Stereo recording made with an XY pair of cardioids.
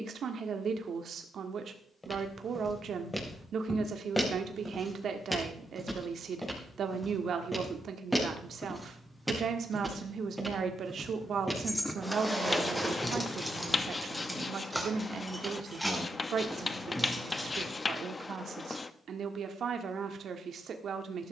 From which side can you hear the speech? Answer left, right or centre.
right.